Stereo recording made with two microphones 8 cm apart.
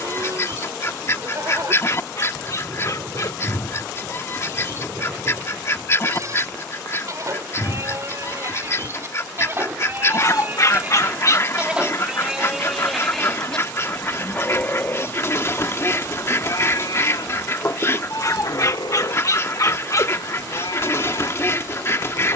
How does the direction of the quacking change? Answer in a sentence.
You can hear the quacking stay in one place.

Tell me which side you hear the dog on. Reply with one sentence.
In this clip you hear the dog on the left.